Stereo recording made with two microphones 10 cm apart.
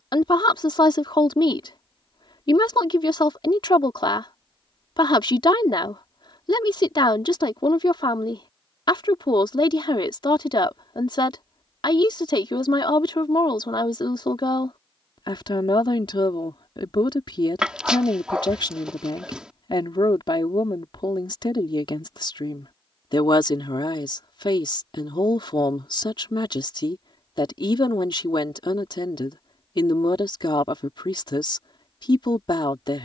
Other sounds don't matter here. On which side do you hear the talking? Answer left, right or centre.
left.